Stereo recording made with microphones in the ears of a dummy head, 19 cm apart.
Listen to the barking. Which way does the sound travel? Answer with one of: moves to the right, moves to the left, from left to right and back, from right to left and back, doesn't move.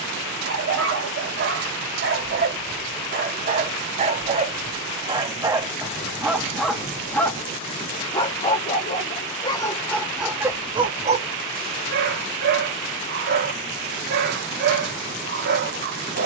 from right to left and back.